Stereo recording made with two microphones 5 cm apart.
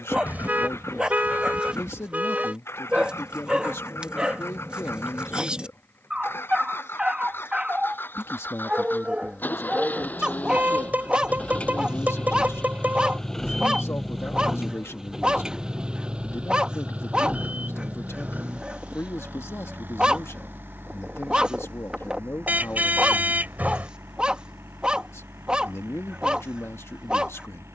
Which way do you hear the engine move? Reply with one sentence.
In this clip you hear the engine travel towards the right.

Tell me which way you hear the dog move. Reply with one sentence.
You can hear the dog stay put.